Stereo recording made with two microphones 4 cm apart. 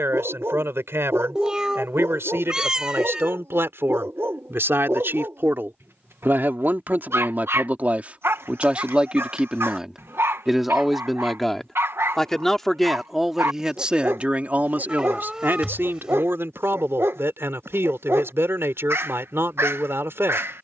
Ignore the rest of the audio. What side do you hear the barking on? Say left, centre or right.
right.